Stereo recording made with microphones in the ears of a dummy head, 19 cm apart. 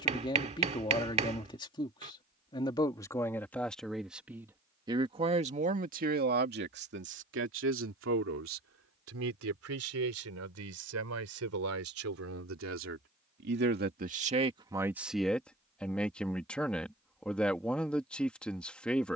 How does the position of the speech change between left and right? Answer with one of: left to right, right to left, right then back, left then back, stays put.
right then back.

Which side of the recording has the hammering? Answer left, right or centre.
right.